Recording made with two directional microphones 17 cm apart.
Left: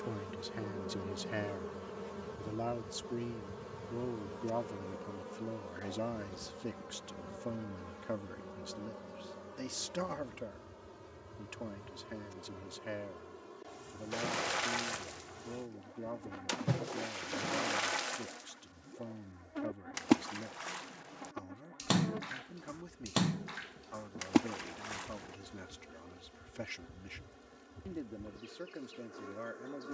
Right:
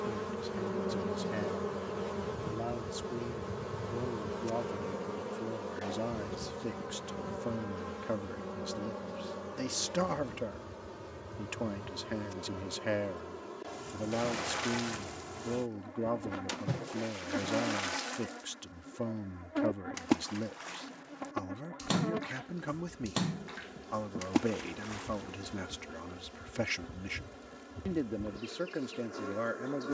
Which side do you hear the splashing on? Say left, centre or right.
centre.